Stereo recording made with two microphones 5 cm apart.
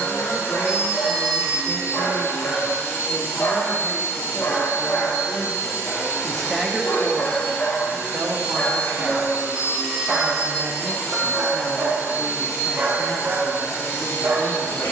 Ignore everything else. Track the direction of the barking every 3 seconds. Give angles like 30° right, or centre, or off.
60° left, 50° left, 40° left, 10° right, 50° right.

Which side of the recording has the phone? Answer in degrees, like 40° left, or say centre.
30° right.